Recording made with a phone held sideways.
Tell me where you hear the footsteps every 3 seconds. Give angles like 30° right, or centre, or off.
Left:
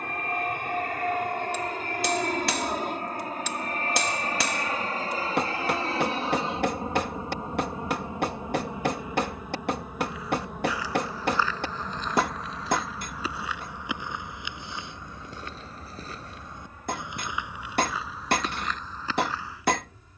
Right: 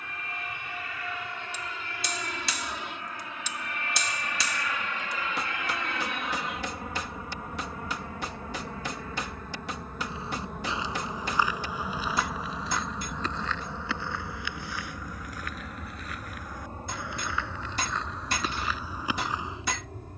off, off, off, 20° right, 10° left, 20° left, 10° right.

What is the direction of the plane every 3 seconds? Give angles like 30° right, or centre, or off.
60° left, 40° left, 30° left, centre, 20° right, 40° right, 50° right.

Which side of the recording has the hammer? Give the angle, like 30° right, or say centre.
60° left.